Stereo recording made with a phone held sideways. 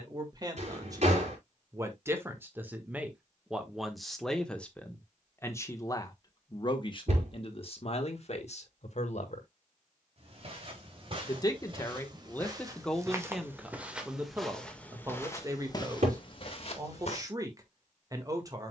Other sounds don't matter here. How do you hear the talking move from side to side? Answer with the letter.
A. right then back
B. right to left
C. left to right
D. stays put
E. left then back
E.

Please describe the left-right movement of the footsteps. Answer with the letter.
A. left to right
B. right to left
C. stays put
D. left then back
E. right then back
B.